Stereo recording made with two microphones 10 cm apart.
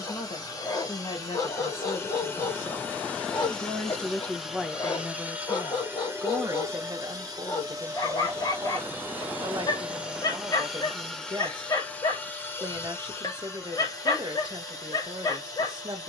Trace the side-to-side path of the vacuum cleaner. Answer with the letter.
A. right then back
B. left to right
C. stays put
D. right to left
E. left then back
A.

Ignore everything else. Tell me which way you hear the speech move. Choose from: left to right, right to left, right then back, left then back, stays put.
left to right.